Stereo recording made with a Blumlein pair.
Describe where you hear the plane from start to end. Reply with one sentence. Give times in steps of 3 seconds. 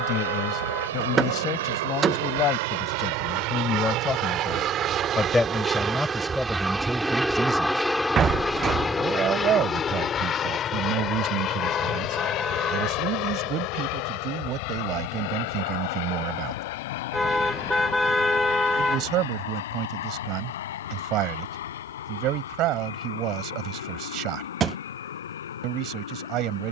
In this clip you hear the plane on the right from 0 s, in the centre from 6 s and on the left from 9 s.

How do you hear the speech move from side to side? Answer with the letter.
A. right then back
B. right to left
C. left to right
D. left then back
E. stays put
C.